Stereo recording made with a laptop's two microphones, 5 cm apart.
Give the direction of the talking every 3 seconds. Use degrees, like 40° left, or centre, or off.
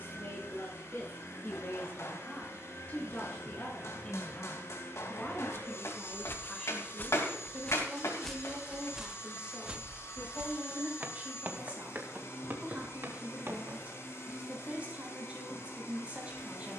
30° left, 20° left, centre, 20° right, 30° right, 30° right.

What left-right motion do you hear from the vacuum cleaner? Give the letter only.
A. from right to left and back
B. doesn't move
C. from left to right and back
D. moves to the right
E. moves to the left
B.